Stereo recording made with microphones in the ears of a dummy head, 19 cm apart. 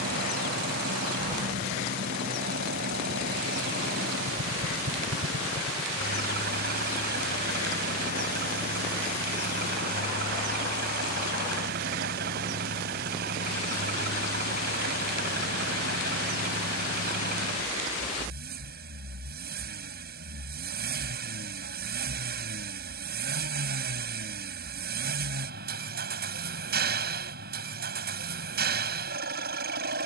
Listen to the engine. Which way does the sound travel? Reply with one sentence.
You can hear the engine stay put.